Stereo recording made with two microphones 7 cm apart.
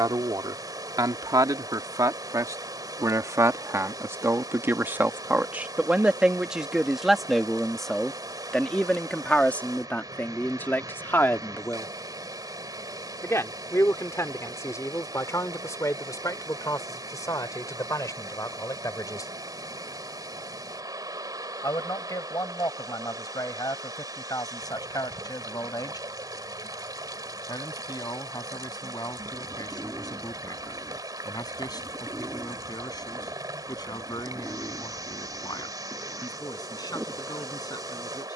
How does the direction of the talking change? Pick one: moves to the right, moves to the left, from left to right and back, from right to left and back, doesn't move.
moves to the left.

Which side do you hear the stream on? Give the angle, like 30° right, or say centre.
60° right.